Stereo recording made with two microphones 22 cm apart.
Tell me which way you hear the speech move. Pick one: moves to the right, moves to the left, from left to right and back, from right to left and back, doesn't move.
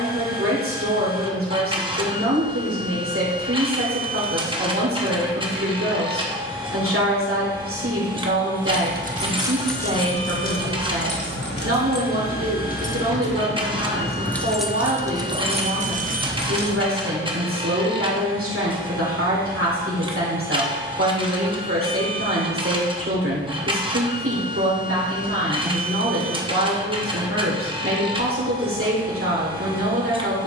doesn't move.